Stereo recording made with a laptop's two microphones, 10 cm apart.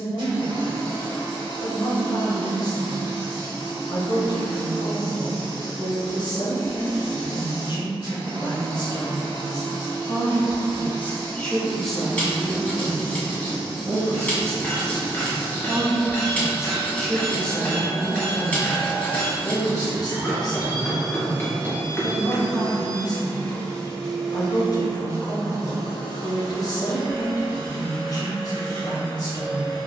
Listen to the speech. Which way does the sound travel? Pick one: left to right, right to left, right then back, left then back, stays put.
right then back.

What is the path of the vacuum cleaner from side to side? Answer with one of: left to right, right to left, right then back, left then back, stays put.
left then back.